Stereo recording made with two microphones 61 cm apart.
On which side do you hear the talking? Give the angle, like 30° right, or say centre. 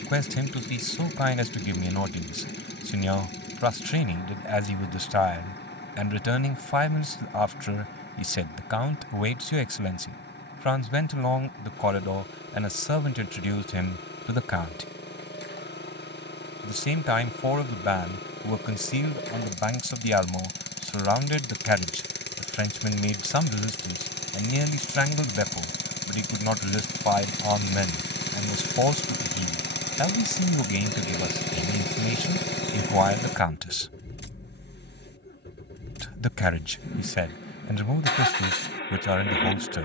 50° left.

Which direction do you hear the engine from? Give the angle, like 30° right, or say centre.
20° left.